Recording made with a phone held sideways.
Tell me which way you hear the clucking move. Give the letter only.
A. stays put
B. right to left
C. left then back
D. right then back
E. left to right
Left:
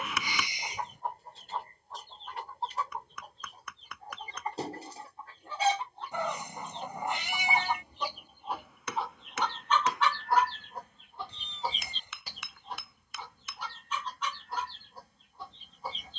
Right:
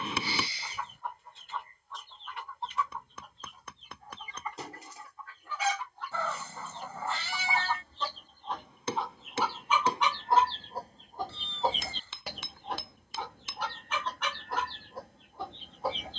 E.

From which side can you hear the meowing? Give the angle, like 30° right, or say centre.
20° left.